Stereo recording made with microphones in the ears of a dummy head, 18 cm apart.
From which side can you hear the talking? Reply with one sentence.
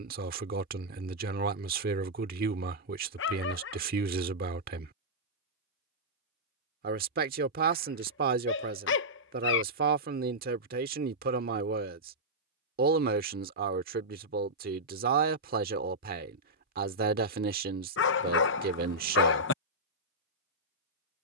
You can hear the talking on the right.